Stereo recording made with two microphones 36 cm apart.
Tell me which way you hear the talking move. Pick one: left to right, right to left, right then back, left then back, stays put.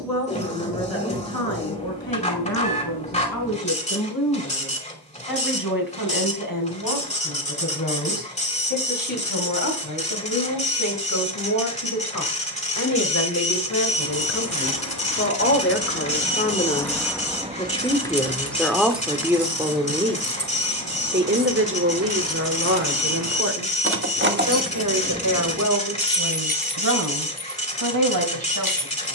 left to right.